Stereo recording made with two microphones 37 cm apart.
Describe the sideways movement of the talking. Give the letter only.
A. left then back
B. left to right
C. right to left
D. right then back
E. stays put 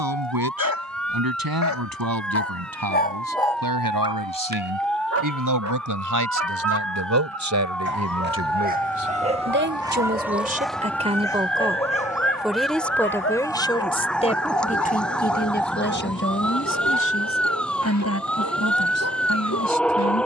C.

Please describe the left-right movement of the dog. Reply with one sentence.
You can hear the dog move from left to right and back again.